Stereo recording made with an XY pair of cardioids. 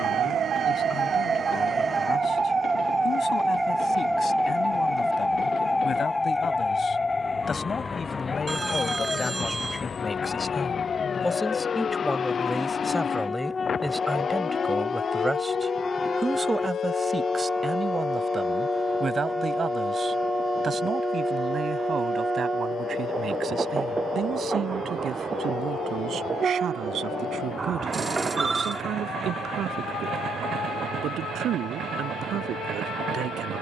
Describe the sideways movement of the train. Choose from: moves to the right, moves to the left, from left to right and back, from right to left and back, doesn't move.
moves to the right.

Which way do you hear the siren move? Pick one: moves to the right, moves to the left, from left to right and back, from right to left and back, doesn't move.
moves to the left.